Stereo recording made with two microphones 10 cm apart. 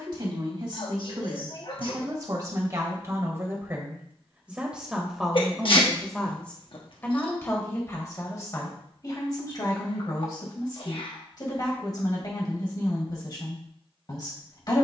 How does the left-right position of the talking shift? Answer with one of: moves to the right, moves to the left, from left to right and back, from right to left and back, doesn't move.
moves to the left.